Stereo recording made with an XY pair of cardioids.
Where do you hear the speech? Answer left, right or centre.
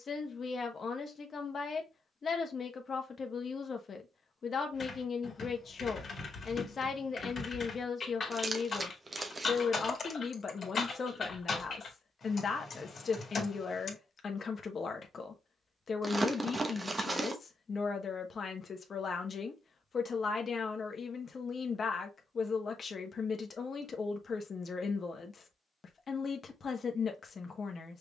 left.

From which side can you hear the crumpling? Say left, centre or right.
right.